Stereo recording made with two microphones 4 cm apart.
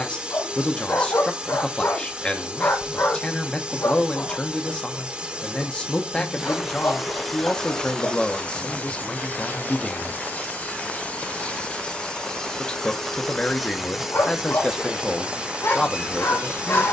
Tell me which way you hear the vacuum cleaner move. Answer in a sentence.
In this clip you hear the vacuum cleaner move from right to left and back again.